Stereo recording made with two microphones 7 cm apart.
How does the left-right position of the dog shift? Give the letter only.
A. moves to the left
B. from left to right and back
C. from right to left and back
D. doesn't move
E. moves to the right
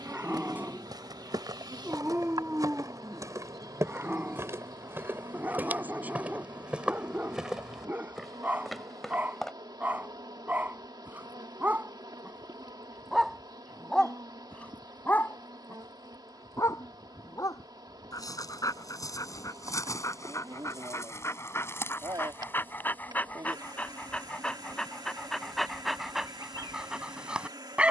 C.